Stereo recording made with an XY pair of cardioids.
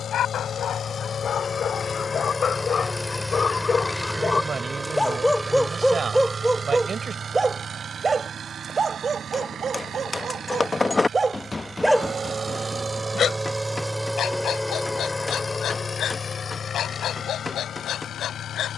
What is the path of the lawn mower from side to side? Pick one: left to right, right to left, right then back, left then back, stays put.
right then back.